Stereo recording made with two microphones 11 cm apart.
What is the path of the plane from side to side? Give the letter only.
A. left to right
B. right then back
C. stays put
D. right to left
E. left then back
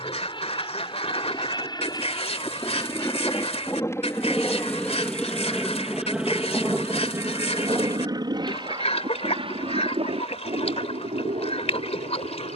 A.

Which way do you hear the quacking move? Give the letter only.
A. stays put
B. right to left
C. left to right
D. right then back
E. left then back
A.